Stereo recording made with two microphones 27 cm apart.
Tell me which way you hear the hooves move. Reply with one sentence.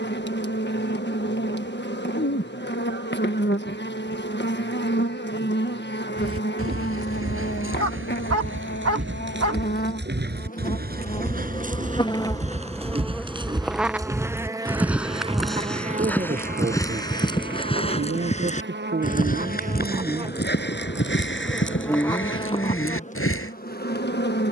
In this clip you hear the hooves travel towards the left.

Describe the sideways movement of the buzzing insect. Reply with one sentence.
In this clip you hear the buzzing insect move from left to right and back again.